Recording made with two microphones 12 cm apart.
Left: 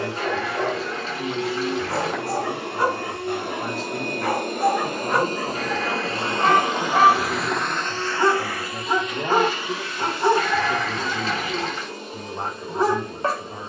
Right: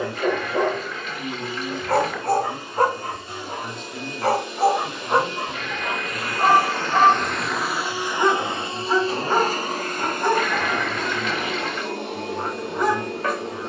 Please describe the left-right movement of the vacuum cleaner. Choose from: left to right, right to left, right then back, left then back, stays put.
left to right.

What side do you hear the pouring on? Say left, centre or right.
left.